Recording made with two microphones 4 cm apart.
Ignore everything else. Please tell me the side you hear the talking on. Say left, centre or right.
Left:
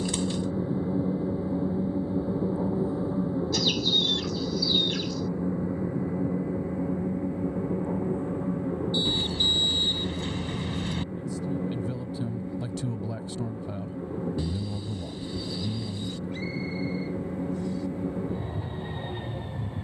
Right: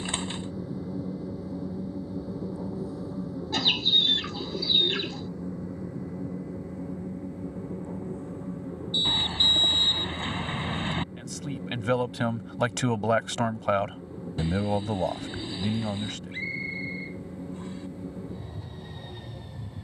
right.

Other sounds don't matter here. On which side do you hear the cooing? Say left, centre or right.
right.